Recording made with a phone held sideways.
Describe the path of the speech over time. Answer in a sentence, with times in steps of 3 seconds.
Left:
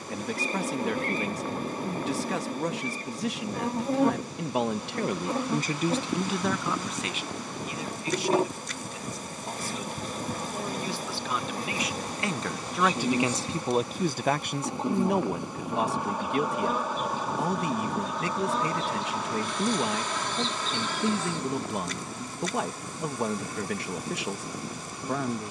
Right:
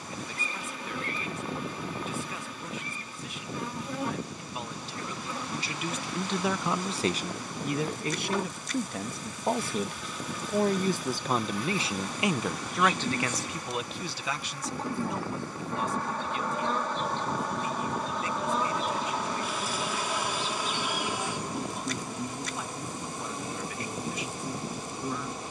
In this clip you hear the speech on the left from 0 s, on the right from 6 s and on the left from 12 s.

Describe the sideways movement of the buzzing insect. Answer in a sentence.
You can hear the buzzing insect move from left to right.